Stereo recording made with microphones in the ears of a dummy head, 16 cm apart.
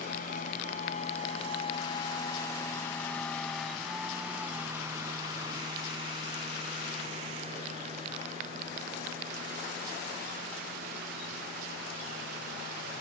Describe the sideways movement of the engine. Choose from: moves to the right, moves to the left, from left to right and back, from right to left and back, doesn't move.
moves to the right.